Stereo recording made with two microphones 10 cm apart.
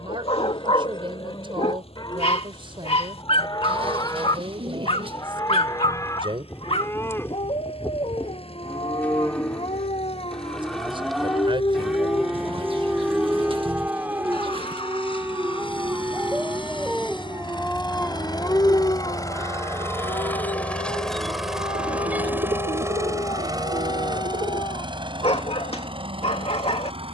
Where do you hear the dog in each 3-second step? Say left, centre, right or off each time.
left, left, left, left, centre, centre, left, left, left.